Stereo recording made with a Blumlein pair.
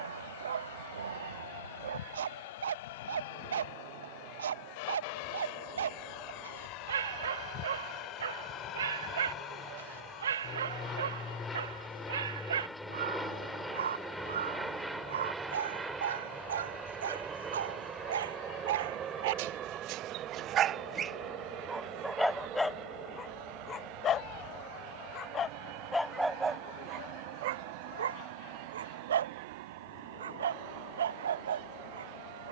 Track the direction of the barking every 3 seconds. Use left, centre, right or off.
right, right, right, right, right, right, right, centre, centre, right, right.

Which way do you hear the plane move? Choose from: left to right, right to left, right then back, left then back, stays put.
left to right.